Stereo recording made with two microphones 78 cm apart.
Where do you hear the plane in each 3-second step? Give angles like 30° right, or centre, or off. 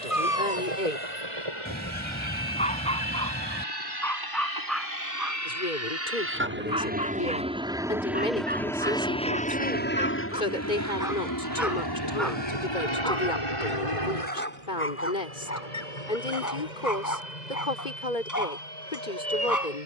40° right, 30° right, 10° right, 20° left, 40° left, 50° left, 60° left.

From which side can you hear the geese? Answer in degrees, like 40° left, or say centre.
10° left.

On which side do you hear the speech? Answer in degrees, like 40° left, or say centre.
80° left.